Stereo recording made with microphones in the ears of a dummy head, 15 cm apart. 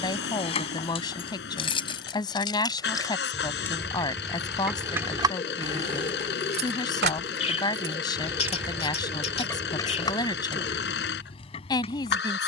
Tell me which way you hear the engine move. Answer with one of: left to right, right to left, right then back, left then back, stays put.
stays put.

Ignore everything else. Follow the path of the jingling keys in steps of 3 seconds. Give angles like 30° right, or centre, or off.
30° left, 10° right, 40° right, 30° left.